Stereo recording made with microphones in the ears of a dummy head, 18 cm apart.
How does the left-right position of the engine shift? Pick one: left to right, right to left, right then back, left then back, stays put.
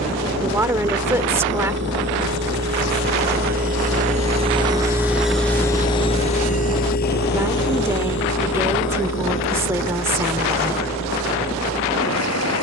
right to left.